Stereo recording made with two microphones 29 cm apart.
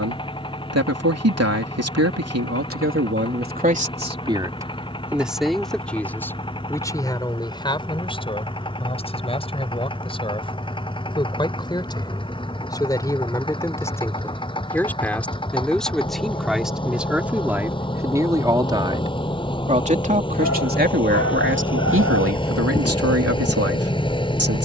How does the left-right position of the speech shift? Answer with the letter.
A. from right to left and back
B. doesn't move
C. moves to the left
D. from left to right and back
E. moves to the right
A.